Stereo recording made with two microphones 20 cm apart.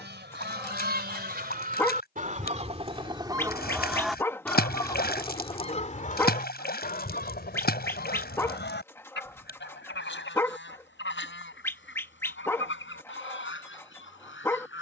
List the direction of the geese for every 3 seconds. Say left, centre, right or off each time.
right, centre, left, left, left.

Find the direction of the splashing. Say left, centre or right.
left.